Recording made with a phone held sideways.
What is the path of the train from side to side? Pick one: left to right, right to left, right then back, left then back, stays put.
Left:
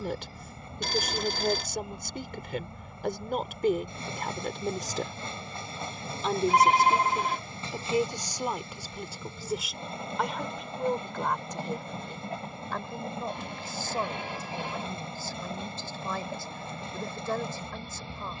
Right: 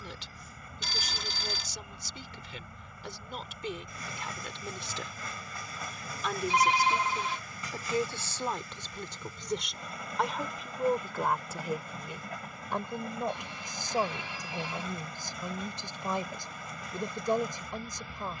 stays put.